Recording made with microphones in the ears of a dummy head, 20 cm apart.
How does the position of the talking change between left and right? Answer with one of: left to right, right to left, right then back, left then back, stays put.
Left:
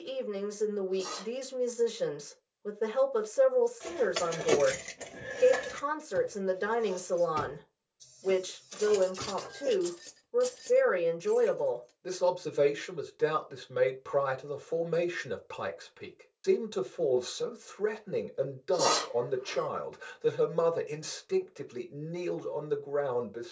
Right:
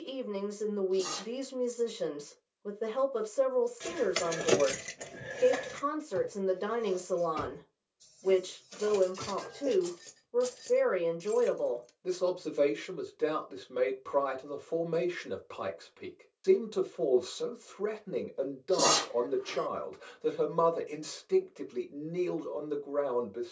stays put.